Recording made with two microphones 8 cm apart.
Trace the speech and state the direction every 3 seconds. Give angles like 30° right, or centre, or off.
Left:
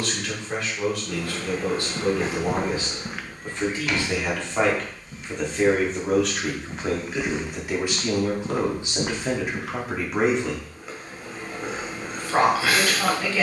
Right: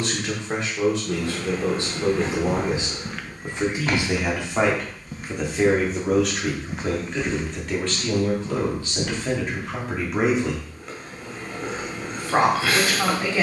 30° right, 10° right, 10° left, centre, 30° right.